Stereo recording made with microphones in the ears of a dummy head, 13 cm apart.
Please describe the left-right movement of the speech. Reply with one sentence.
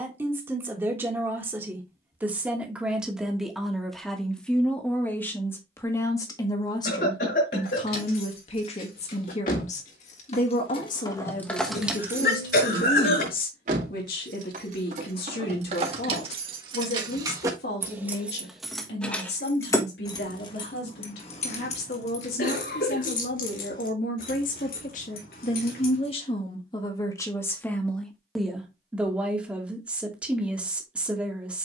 In this clip you hear the speech go left and come back.